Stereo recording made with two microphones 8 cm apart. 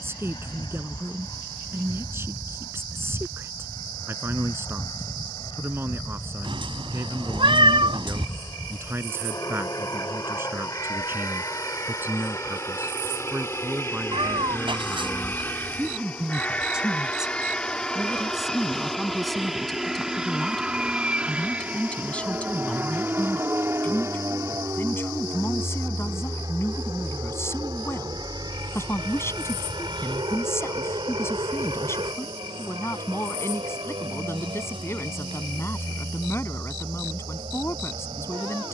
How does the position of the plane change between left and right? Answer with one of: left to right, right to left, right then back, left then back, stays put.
left to right.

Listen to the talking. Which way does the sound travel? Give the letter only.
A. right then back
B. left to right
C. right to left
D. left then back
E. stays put
C.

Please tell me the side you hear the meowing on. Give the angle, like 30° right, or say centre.
70° right.